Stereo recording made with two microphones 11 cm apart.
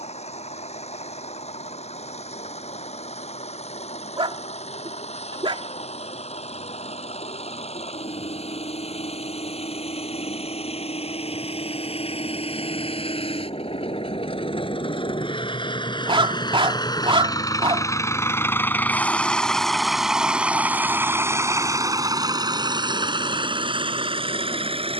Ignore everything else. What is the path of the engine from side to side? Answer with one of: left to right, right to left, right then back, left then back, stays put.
left to right.